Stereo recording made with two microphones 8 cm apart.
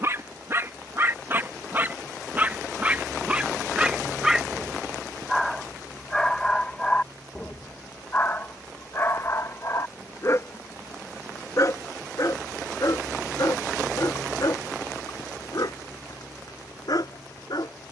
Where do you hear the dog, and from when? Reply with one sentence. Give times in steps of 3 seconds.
You can hear the dog on the right from 0 s, in the centre from 3 s and on the left from 6 s.